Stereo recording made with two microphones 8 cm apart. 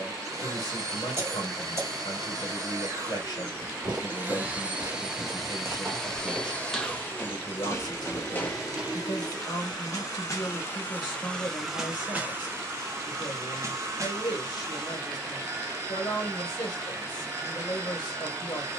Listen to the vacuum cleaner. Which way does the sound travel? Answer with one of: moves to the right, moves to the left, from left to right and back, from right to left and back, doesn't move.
from right to left and back.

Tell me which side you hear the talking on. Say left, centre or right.
left.